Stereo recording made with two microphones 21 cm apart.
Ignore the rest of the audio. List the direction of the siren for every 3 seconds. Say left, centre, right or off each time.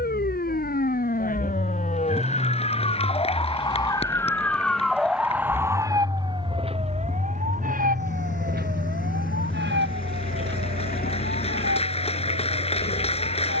left, centre, right, right, right.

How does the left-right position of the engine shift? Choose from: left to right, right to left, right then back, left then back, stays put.
right to left.